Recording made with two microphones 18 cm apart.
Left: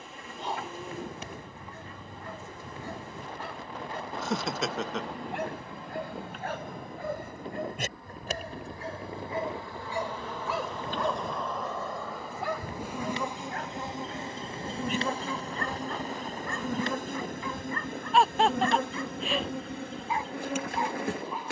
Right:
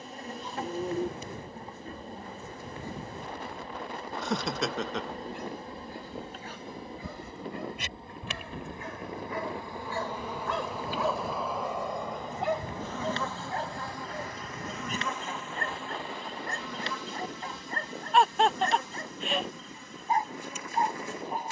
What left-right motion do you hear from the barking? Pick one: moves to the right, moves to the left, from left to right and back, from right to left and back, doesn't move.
moves to the right.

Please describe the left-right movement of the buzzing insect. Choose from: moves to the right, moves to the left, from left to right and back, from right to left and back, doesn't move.
moves to the left.